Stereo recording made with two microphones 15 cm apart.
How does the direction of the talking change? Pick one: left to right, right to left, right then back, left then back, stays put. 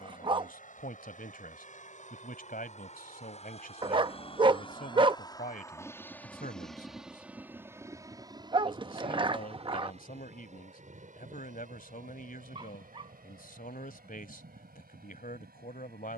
stays put.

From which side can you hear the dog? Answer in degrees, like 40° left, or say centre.
30° right.